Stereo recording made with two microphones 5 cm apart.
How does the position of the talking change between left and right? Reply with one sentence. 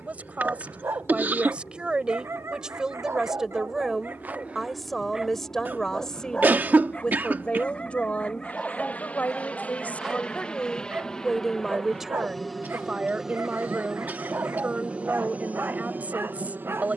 In this clip you hear the talking go left and come back.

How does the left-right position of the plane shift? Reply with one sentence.
You can hear the plane move from left to right.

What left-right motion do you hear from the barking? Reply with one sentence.
You can hear the barking go left and come back.